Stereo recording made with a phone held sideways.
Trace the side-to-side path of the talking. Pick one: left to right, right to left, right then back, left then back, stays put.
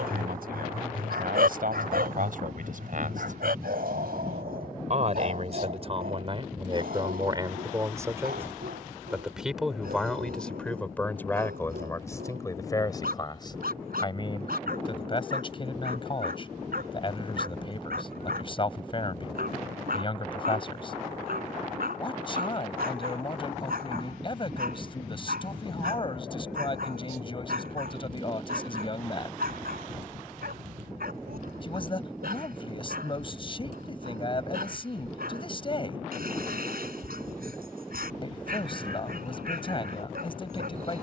right to left.